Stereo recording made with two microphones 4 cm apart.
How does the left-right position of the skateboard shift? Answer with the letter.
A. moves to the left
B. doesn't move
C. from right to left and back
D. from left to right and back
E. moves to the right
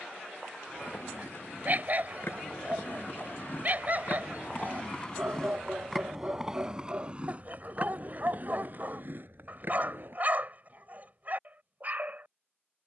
E.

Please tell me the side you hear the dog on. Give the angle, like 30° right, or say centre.
40° right.